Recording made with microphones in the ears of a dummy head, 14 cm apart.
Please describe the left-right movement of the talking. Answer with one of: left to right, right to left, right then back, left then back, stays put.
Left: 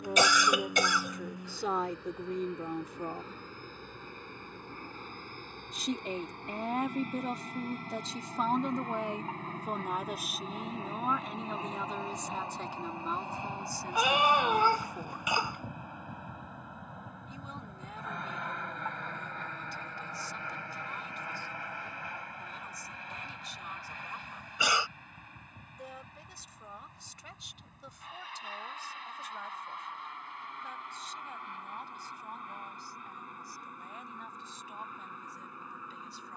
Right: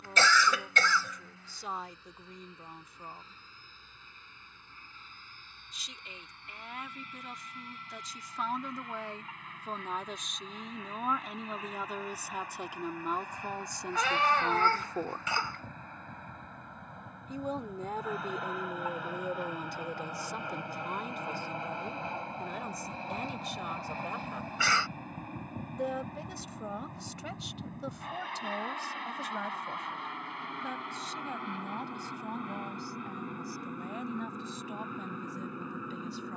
left to right.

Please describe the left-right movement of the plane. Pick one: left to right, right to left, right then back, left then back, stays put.
left to right.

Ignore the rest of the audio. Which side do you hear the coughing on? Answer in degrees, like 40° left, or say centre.
10° left.